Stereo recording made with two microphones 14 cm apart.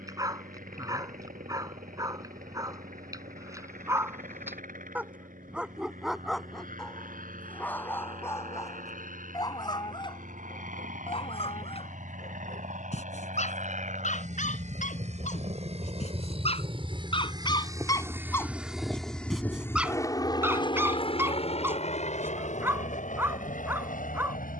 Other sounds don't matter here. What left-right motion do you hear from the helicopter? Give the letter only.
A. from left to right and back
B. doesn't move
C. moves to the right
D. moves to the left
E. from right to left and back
D.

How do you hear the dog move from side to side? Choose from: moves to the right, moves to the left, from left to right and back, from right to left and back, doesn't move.
from right to left and back.